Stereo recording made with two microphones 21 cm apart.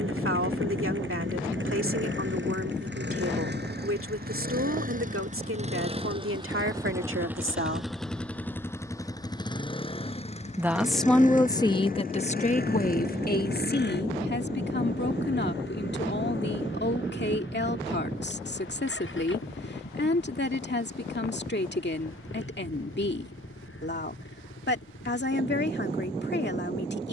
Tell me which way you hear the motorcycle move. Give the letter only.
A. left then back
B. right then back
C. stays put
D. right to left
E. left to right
D.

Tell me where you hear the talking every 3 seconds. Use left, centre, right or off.
right, right, right, centre, left, left, left, left, left.